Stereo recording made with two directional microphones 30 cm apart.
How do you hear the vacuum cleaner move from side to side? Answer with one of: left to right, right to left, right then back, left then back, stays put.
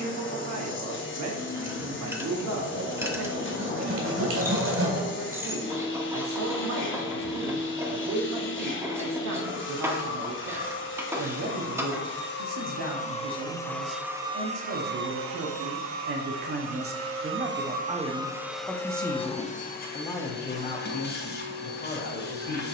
right then back.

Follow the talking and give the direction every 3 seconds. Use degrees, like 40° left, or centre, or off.
60° right, 60° right, 60° right, 60° right, 60° right, 40° right, 10° left, 30° left.